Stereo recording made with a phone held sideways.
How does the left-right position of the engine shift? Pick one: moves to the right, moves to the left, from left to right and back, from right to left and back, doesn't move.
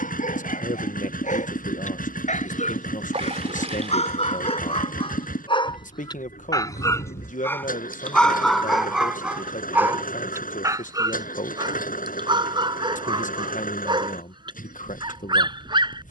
doesn't move.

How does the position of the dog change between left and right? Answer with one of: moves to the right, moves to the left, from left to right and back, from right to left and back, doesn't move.
moves to the right.